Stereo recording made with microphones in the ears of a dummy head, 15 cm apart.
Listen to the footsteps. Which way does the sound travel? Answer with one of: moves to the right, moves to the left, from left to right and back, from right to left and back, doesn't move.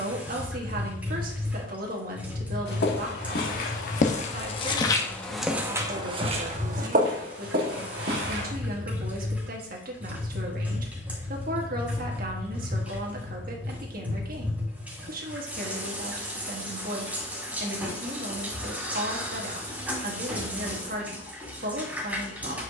moves to the right.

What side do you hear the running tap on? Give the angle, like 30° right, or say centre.
10° right.